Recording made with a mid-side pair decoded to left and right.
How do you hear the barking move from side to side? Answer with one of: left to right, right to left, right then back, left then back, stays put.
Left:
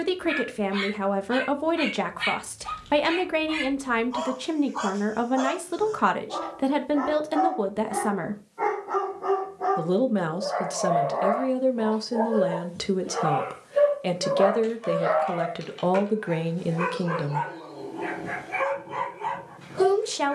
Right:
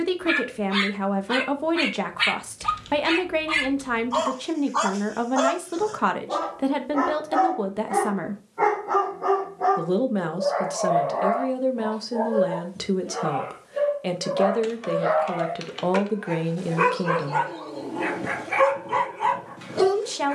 left then back.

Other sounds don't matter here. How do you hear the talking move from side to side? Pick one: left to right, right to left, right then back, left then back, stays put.
stays put.